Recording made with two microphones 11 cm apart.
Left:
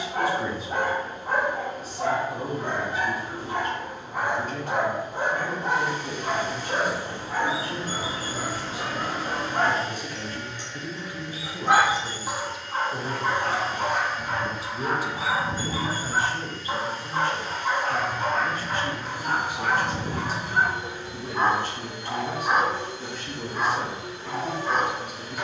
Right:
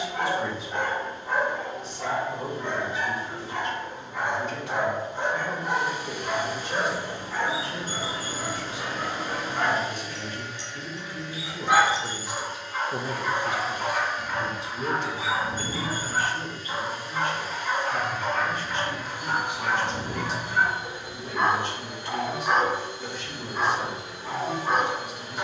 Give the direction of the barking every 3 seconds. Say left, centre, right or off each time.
left, left, left, left, left, left, left, centre, centre.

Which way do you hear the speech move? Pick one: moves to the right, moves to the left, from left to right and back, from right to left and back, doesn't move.
from left to right and back.